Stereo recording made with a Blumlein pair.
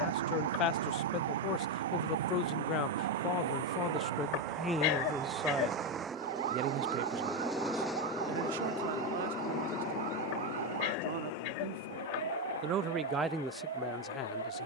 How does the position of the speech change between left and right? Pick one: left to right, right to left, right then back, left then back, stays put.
right then back.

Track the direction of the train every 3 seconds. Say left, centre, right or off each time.
right, right, centre, left, left.